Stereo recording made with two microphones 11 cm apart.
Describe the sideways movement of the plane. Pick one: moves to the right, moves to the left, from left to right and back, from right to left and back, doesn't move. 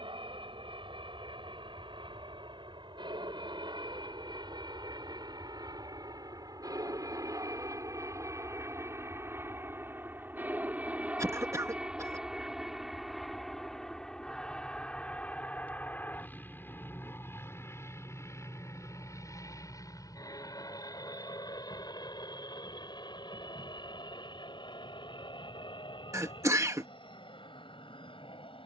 moves to the left.